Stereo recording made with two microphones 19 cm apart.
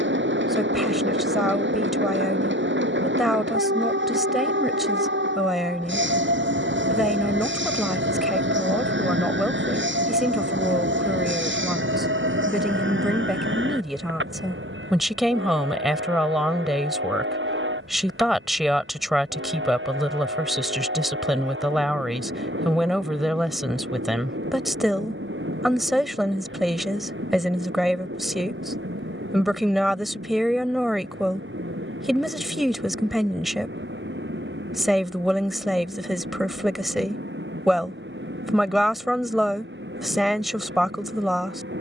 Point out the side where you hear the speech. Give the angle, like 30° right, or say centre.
centre.